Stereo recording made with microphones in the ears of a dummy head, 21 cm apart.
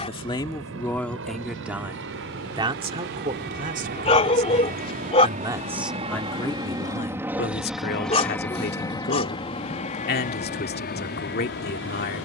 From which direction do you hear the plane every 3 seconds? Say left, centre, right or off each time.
right, right, centre, left.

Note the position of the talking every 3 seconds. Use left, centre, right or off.
centre, right, left, left.